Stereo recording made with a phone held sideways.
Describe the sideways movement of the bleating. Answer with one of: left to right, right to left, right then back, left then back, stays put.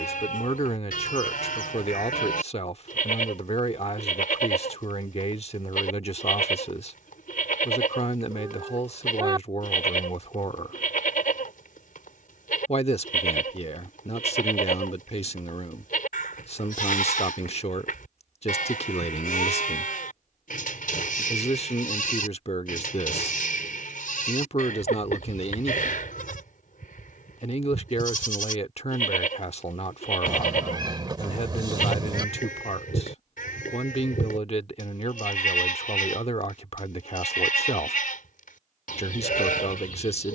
stays put.